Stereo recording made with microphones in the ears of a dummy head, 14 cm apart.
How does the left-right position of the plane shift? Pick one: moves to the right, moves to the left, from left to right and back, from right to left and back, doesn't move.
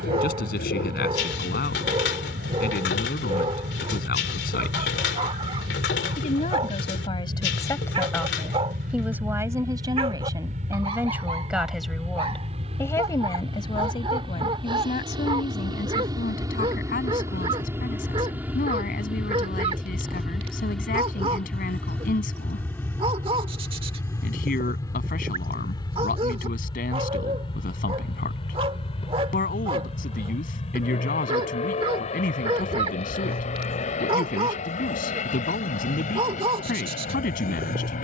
moves to the left.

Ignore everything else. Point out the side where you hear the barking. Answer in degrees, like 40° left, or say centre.
30° right.